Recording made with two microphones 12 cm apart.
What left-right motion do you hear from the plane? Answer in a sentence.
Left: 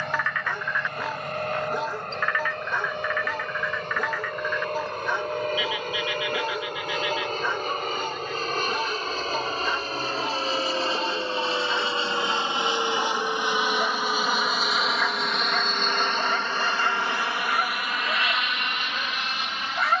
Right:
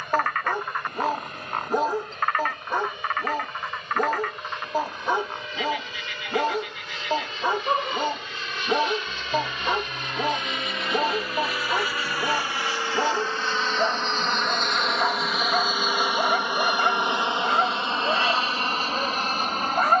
You can hear the plane travel towards the right.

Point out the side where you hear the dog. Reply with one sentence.
In this clip you hear the dog on the right.